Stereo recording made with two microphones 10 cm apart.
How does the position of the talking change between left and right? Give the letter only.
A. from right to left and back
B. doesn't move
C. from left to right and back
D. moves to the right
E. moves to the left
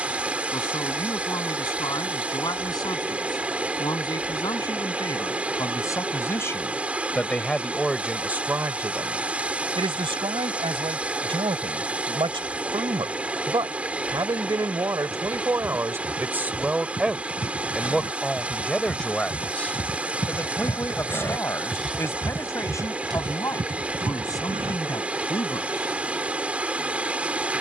C.